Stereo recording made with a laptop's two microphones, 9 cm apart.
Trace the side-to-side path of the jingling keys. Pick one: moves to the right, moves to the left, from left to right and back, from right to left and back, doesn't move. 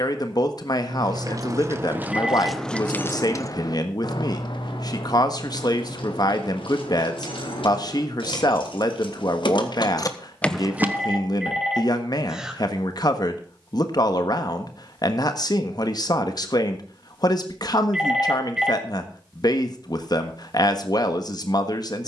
from right to left and back.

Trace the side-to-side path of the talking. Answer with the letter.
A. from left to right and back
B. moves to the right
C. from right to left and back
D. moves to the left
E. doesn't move
E.